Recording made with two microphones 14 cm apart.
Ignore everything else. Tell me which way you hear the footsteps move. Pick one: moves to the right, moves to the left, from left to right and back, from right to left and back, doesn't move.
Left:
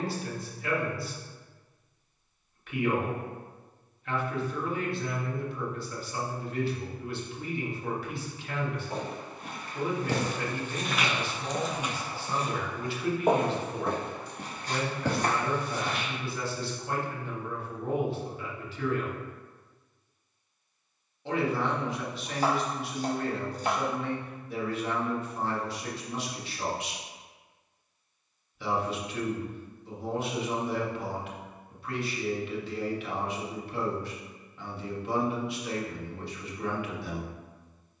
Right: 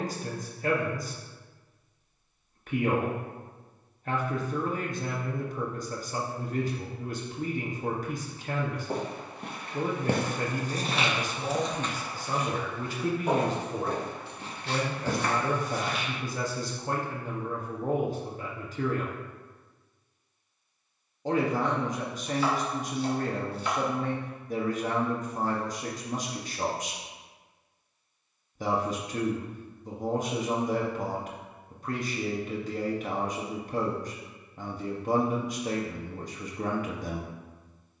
moves to the left.